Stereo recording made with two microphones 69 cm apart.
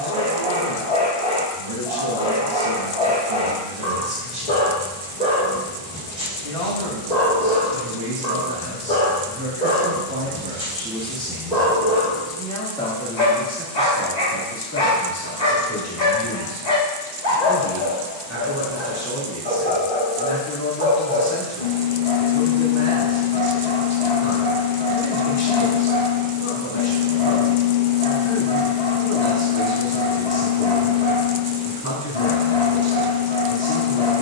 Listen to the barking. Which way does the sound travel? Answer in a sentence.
You can hear the barking stay put.